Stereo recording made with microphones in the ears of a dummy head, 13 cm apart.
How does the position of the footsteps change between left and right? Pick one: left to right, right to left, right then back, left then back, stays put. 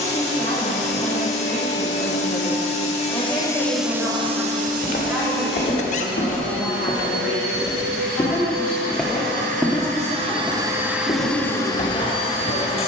right then back.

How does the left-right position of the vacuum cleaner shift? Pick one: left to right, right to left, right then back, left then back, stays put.
right then back.